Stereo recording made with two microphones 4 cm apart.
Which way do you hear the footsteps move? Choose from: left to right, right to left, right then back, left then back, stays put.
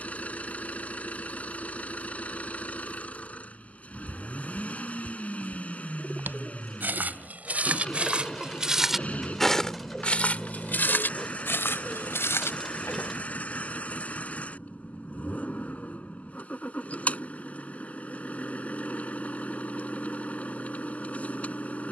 right to left.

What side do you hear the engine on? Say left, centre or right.
left.